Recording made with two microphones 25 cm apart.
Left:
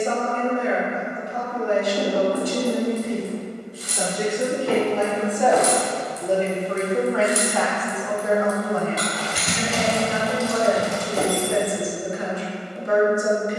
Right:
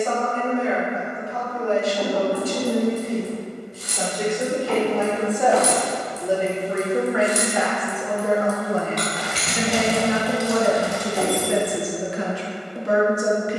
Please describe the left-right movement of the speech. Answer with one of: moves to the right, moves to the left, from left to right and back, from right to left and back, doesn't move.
moves to the right.